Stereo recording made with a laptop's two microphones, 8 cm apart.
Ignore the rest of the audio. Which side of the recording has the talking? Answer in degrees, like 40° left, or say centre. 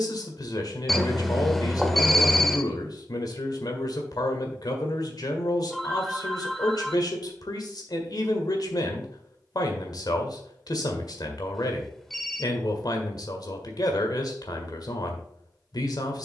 60° left.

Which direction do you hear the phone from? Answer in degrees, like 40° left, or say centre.
centre.